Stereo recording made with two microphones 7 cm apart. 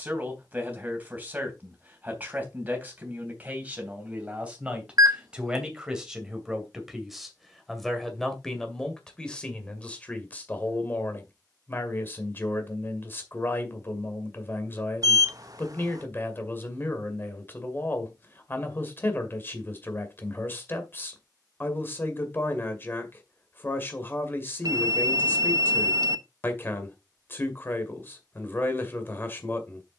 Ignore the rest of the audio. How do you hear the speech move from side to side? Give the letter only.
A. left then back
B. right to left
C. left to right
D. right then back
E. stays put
B.